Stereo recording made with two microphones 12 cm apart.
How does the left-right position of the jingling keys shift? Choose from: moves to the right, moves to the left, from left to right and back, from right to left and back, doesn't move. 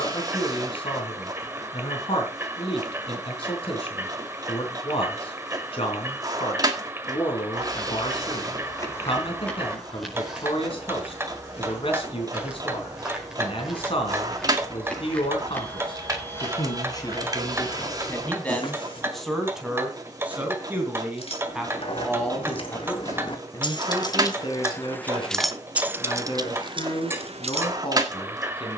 moves to the right.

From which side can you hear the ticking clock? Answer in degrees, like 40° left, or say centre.
20° right.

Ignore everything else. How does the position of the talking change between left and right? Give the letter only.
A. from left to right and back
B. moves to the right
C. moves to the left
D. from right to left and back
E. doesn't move
A.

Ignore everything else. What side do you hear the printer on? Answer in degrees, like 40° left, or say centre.
30° right.